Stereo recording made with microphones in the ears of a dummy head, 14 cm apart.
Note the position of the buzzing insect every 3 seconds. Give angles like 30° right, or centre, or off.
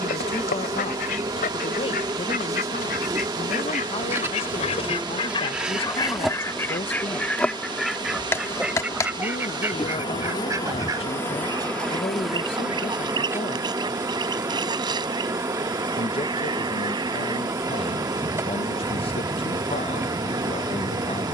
20° right, 10° right, 10° left, 20° left, 10° right, 20° right, 20° right.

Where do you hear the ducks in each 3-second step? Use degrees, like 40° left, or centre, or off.
60° left, 40° left, 10° left, 20° right, 30° right, 30° right, 30° right.